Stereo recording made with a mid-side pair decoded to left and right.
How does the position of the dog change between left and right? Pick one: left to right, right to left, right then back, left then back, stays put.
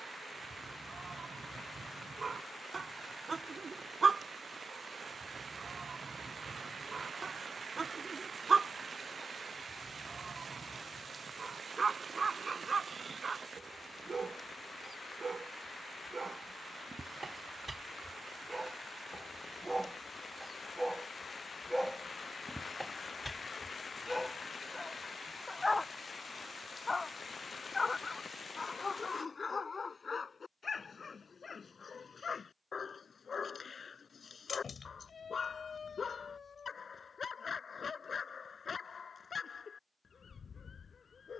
right to left.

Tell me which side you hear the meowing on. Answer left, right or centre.
left.